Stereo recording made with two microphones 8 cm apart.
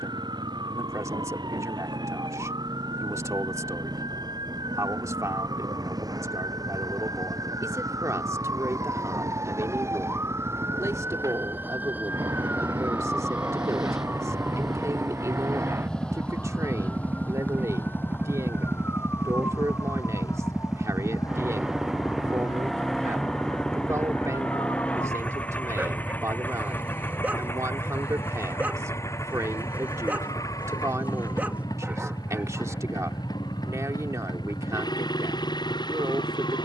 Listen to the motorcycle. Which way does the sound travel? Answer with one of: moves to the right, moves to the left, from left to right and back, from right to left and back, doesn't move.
moves to the left.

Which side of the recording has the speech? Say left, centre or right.
right.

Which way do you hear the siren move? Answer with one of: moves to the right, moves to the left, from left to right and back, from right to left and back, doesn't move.
moves to the left.